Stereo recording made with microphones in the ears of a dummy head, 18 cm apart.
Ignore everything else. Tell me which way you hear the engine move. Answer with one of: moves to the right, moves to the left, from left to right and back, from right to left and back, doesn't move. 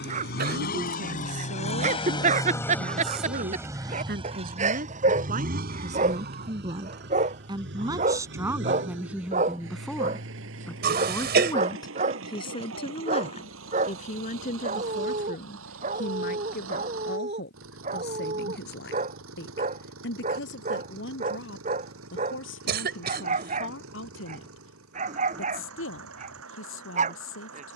moves to the right.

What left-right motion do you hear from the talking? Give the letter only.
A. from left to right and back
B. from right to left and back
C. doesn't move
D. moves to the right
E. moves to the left
E.